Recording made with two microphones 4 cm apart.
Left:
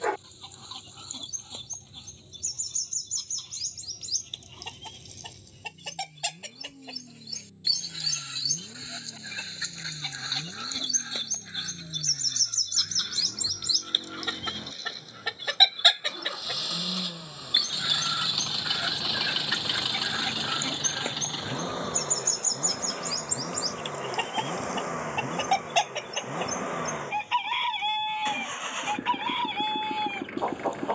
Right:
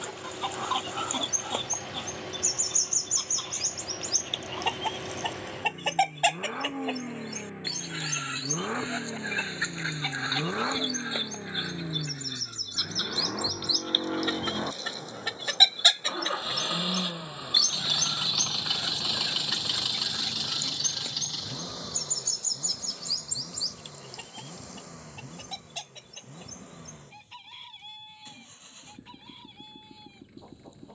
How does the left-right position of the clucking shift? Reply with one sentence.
You can hear the clucking move from right to left.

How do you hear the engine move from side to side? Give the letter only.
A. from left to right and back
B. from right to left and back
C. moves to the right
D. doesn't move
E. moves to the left
E.